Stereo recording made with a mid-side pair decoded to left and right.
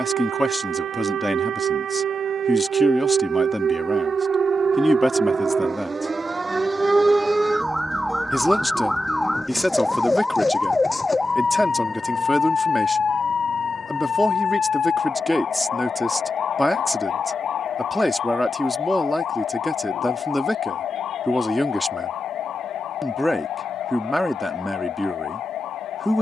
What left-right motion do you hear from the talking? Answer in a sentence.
You can hear the talking stay in one place.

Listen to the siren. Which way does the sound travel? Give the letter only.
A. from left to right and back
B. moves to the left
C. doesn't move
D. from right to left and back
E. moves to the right
B.